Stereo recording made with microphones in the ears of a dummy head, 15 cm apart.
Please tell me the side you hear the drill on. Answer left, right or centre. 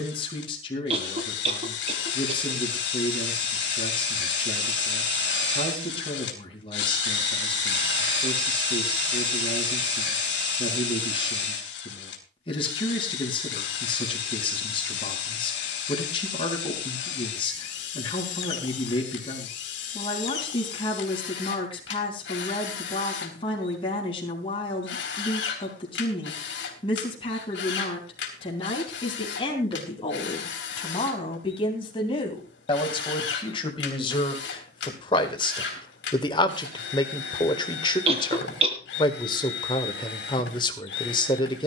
left.